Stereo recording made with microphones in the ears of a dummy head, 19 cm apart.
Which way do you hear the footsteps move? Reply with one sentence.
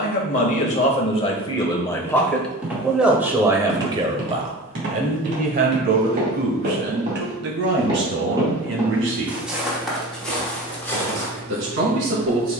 You can hear the footsteps move from left to right and back again.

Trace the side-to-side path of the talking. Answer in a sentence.
You can hear the talking travel towards the right.